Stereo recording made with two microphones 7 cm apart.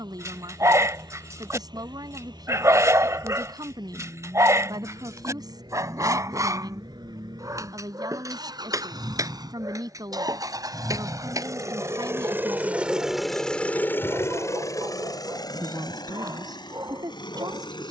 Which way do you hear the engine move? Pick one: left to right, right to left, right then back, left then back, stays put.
right to left.